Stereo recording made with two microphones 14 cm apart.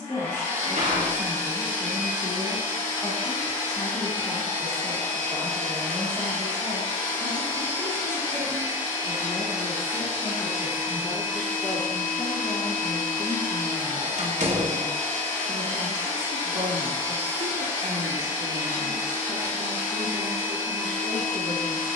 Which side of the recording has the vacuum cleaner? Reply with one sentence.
In this clip you hear the vacuum cleaner on the left.